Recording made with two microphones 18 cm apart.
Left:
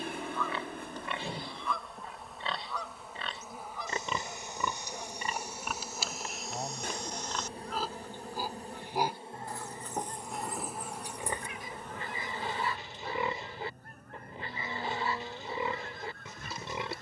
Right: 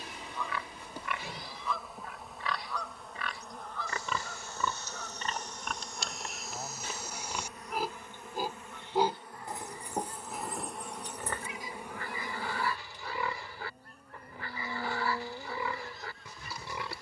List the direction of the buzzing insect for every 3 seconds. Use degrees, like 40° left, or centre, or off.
centre, 10° left, 30° left, 10° left, 10° right, 10° right.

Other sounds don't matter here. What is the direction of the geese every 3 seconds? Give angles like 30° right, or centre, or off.
centre, 20° left, 40° left, 40° left, 50° left, 50° left.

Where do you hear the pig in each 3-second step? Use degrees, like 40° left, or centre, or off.
30° left, 20° left, 10° right, centre, 20° left, 20° left.